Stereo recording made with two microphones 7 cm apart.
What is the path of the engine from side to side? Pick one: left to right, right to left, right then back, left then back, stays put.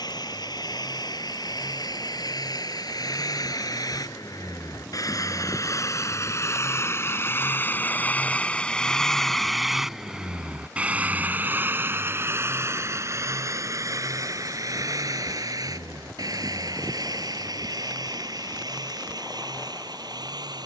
left to right.